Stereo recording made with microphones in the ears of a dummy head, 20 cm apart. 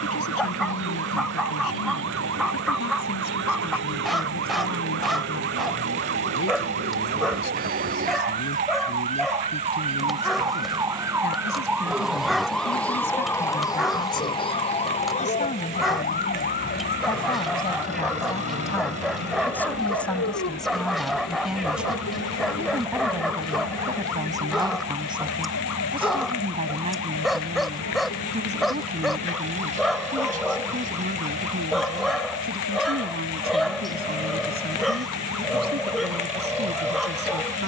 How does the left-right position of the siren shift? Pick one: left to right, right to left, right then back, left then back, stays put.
right to left.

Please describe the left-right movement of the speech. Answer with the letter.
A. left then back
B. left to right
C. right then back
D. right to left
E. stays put
B.